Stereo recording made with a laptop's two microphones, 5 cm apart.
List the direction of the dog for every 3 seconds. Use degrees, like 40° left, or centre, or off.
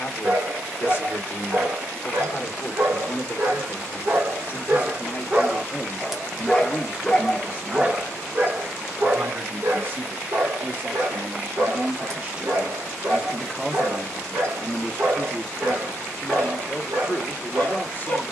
70° right, 40° right, 10° right, 60° right, 70° right, 70° right.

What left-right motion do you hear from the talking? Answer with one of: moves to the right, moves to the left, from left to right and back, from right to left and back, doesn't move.
from left to right and back.